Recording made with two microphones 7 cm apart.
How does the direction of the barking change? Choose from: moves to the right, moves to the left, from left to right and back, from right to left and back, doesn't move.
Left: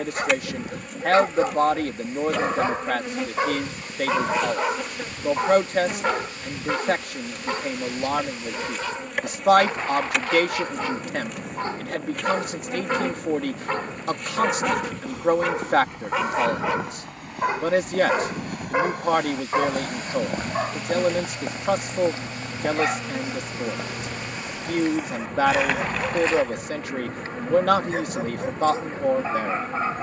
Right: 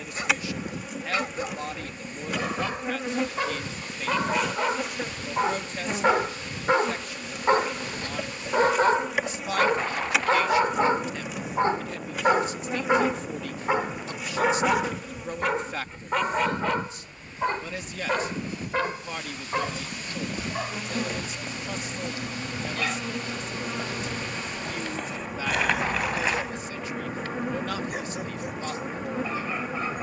from left to right and back.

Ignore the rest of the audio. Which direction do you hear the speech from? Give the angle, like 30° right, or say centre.
60° left.